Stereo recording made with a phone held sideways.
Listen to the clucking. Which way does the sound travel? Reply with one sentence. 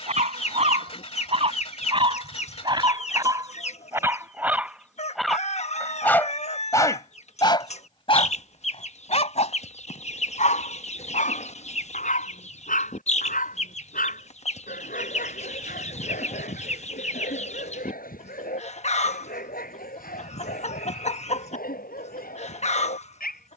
In this clip you hear the clucking stay put.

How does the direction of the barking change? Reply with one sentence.
In this clip you hear the barking move from right to left.